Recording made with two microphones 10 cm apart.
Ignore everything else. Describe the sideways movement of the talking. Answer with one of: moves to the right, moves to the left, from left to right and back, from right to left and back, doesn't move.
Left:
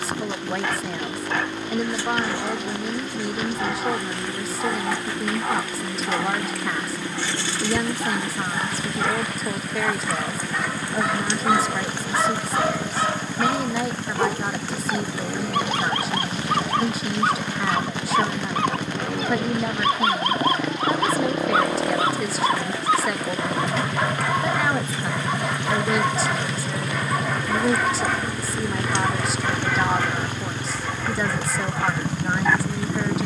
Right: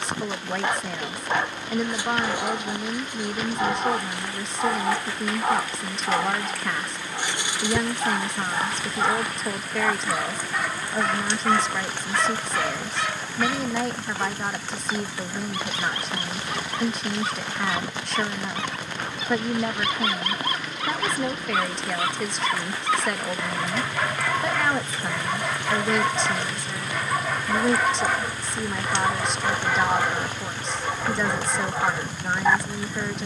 doesn't move.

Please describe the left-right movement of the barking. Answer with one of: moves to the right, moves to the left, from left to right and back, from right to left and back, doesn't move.
from right to left and back.